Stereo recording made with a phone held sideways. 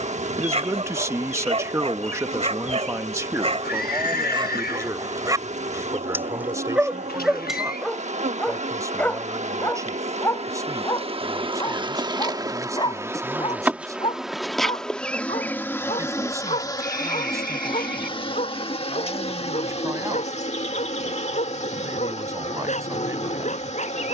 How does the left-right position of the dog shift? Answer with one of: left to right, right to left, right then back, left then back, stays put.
right to left.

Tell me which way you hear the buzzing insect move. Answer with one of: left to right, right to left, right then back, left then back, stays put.
right to left.